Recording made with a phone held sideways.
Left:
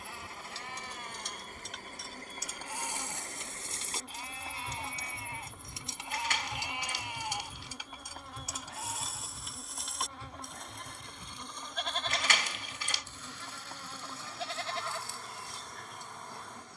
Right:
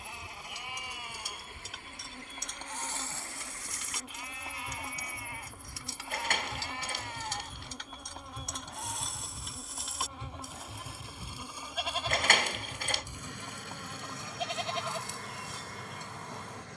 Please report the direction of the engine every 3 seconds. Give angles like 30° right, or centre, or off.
40° left, 30° left, 10° left, 20° right, 50° right, 70° right.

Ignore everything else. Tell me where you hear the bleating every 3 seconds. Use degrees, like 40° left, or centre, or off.
10° right, 30° left, 10° left, centre, 20° right, 20° right.